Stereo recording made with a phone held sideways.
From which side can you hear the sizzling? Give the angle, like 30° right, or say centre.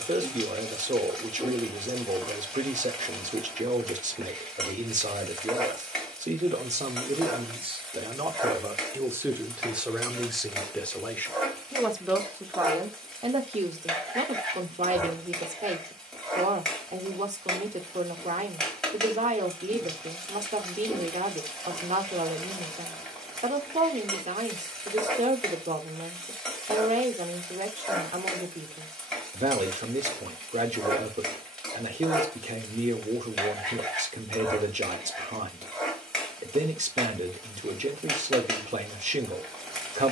centre.